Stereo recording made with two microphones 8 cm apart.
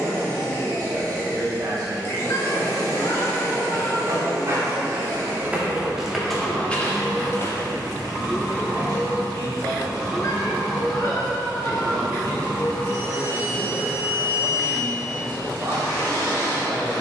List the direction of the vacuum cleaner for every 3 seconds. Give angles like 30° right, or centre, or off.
30° left, 30° left, centre, centre, 30° left, 30° left.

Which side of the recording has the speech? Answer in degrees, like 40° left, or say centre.
60° right.